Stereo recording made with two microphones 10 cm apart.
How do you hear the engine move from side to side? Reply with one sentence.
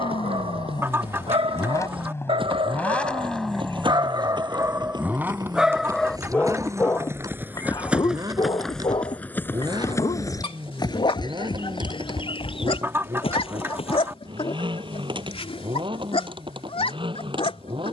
In this clip you hear the engine move from left to right.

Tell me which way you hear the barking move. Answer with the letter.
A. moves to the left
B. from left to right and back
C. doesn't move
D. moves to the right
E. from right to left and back
A.